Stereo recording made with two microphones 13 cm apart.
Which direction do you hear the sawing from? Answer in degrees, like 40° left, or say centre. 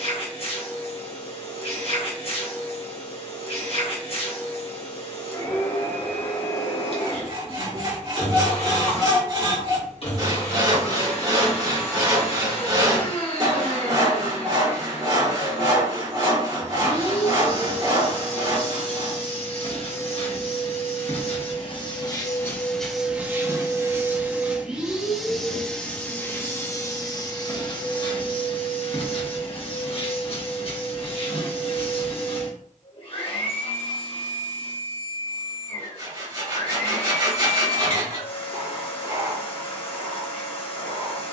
30° right.